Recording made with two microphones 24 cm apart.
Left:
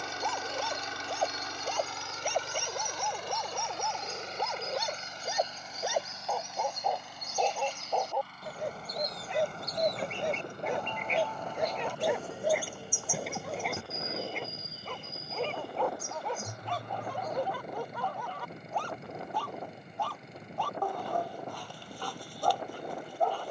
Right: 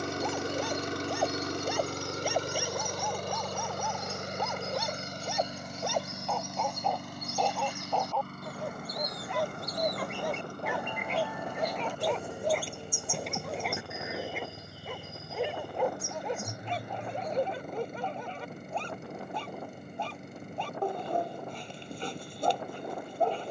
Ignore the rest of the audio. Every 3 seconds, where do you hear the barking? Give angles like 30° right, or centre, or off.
10° right, centre, 10° left, 20° left, centre, 20° right, 20° right, 20° right.